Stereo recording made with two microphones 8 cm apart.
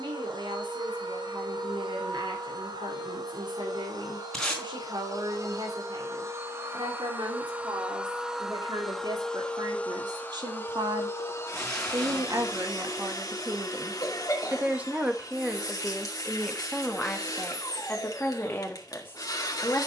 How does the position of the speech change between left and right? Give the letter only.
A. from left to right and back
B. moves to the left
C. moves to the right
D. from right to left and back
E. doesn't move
B.